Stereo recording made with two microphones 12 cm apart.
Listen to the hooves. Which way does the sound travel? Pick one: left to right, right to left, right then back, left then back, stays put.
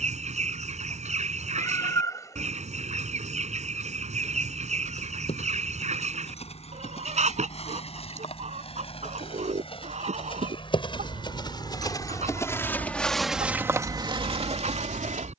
left to right.